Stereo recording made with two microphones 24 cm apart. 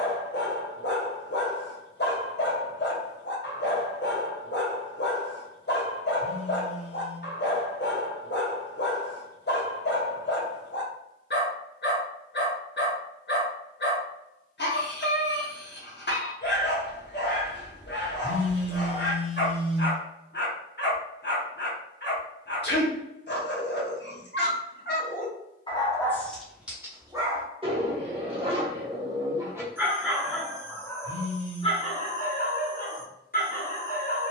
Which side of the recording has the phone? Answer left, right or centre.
left.